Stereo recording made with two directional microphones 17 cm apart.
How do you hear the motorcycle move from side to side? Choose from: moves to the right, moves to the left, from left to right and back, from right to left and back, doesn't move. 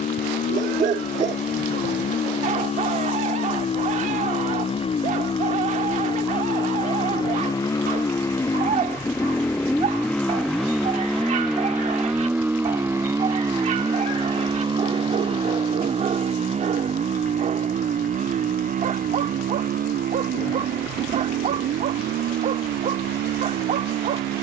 moves to the right.